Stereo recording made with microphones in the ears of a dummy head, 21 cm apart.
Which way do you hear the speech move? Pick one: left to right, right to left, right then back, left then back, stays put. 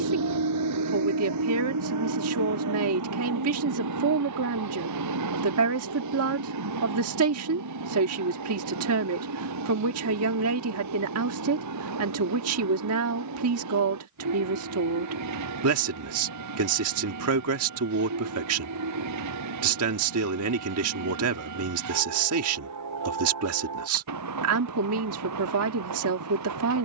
stays put.